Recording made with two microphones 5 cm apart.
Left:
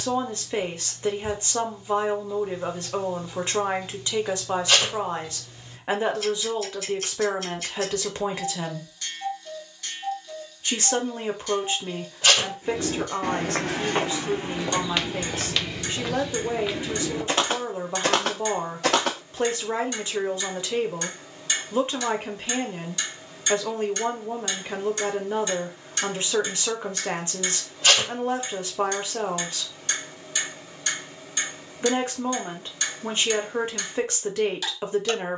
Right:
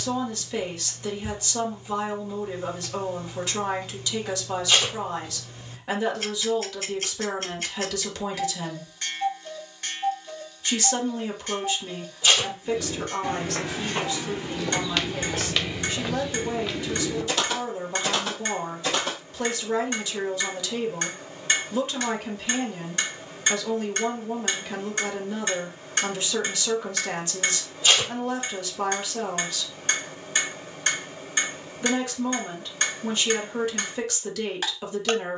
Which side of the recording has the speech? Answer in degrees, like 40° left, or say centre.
30° left.